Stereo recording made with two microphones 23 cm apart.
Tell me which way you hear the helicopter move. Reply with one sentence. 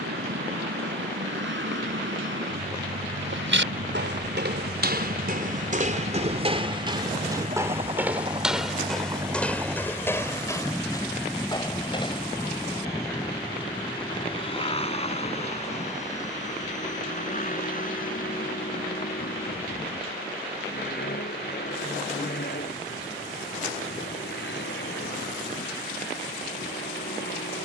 You can hear the helicopter go from the right side to the left.